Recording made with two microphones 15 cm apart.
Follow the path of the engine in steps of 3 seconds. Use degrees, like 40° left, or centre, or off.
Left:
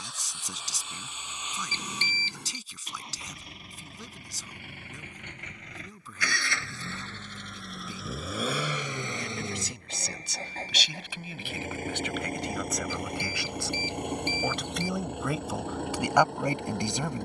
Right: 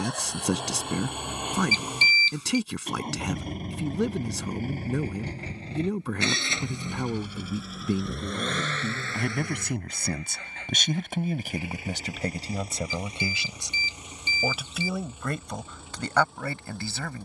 60° right, 40° right, 10° right, 30° left, 60° left, 70° left.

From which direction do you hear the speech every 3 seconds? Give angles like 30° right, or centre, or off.
70° right, 70° right, 70° right, 50° right, 20° right, 10° left.